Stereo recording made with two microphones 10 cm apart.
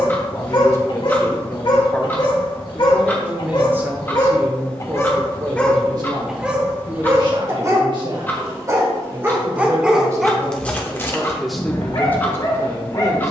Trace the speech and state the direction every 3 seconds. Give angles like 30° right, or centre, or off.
20° left, 30° right, 50° right, 20° right, 30° left.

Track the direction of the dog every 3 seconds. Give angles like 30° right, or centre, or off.
50° left, 30° left, 30° right, 10° left, 40° left.